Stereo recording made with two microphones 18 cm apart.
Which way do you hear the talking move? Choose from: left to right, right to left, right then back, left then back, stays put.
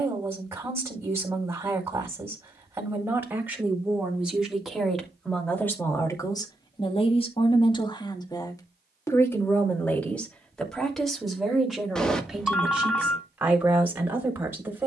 left then back.